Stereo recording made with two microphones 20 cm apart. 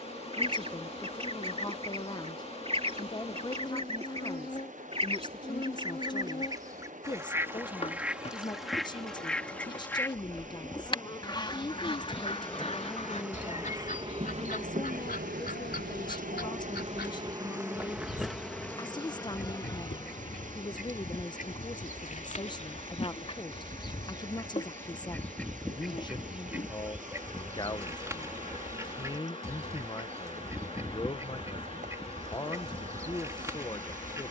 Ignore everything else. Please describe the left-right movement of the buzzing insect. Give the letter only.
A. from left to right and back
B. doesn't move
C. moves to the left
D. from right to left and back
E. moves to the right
A.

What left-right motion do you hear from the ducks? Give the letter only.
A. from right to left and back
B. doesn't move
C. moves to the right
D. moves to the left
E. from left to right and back
A.